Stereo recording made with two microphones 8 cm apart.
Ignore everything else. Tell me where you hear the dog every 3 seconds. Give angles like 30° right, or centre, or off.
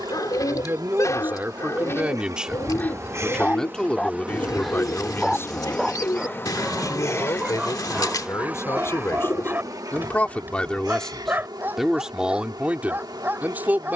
40° left, 10° left, 20° right, 20° right, 20° right.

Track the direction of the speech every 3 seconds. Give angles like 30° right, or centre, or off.
20° right, 20° left, 40° left, 20° left, 20° right.